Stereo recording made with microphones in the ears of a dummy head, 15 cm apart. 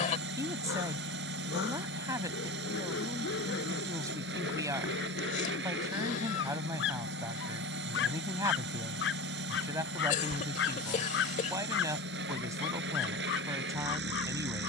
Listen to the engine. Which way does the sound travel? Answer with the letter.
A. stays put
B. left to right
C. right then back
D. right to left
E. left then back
A.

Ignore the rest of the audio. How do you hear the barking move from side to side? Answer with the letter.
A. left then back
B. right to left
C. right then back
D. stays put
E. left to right
D.